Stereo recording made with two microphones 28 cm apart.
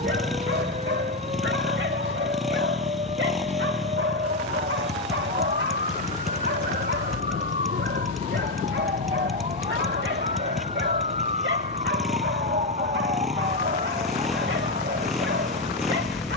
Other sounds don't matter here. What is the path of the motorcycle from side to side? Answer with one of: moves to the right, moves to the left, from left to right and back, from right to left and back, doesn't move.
doesn't move.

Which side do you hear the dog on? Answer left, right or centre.
right.